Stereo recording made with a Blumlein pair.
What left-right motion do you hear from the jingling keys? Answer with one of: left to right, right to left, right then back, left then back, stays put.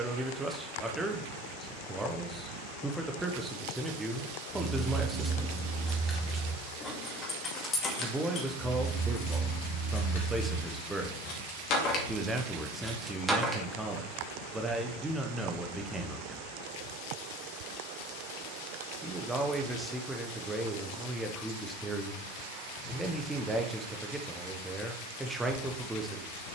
left then back.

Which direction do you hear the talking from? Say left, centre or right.
centre.